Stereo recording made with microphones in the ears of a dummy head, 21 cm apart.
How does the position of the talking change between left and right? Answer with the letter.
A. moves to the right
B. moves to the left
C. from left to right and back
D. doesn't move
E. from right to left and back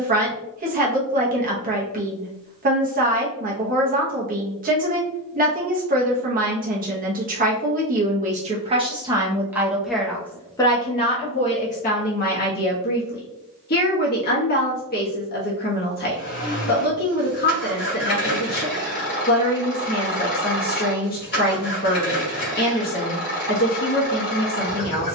B.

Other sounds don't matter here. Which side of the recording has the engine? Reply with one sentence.
You can hear the engine on the left.